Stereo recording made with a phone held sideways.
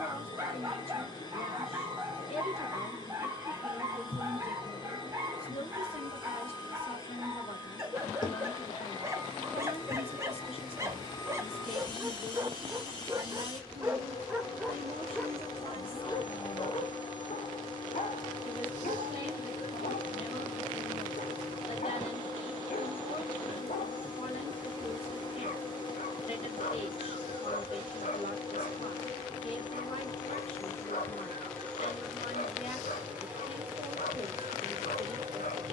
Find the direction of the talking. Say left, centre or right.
left.